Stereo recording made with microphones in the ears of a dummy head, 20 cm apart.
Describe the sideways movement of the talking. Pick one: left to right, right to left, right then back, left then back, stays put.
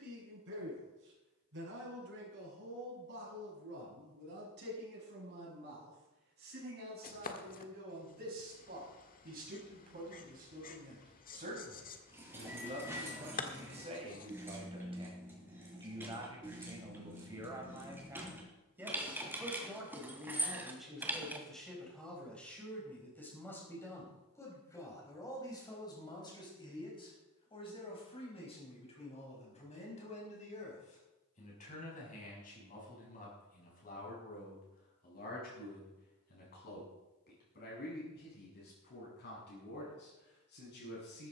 right to left.